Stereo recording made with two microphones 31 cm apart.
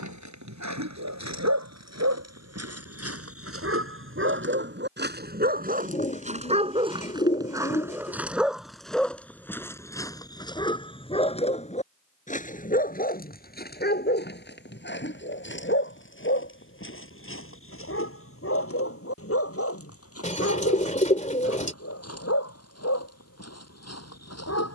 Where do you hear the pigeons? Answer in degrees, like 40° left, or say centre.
20° left.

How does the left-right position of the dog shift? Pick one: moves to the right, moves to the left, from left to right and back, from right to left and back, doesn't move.
moves to the left.